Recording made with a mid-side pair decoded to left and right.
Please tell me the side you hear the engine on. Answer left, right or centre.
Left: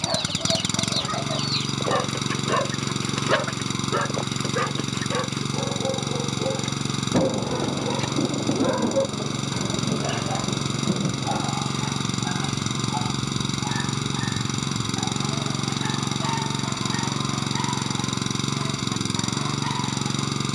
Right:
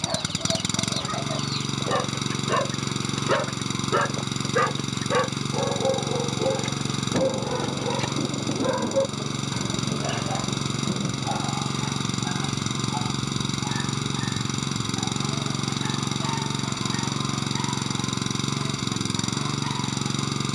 centre.